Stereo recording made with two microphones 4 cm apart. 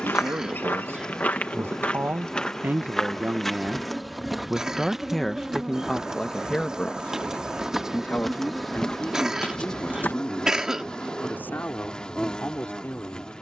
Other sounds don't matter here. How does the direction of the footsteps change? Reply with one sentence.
You can hear the footsteps go right and come back.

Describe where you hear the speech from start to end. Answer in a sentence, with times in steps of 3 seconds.
You can hear the speech on the right from 0 s, in the centre from 3 s and on the left from 6 s.